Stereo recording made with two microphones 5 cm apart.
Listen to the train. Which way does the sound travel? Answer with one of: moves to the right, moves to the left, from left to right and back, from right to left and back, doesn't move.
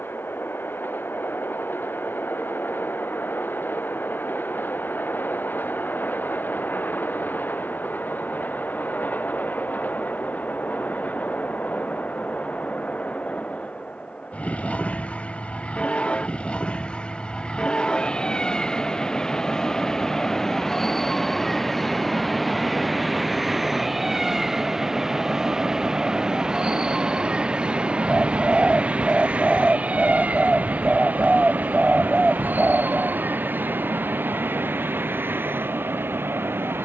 moves to the right.